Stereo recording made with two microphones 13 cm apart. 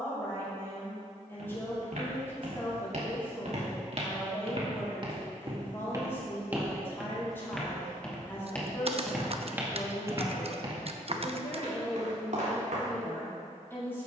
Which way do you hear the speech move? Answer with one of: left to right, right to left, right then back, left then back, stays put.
stays put.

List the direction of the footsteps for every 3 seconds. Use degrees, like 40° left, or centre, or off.
70° right, 50° right, centre, 30° right, 70° right.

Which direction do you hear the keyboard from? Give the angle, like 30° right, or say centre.
50° right.